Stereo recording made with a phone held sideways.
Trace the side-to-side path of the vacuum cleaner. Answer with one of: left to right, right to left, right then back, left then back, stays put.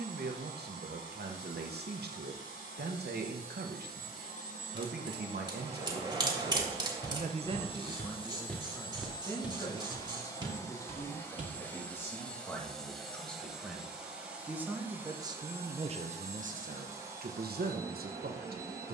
left to right.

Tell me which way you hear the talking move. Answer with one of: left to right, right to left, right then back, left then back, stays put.
left then back.